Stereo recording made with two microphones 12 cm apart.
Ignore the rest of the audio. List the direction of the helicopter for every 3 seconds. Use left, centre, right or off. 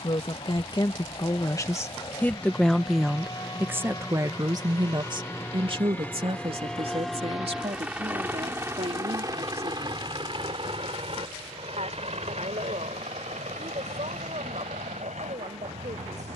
left, left, centre, right, right, right.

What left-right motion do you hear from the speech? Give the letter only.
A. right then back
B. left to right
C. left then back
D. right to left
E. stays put
B.